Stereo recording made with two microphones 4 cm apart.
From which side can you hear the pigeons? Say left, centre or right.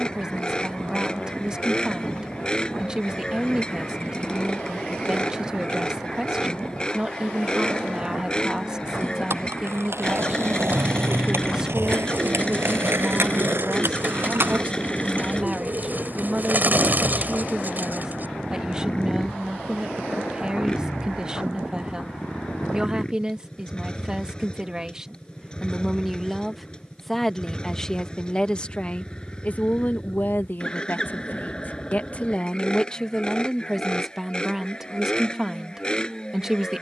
right.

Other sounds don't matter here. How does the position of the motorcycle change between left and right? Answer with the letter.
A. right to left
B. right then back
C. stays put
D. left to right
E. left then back
C.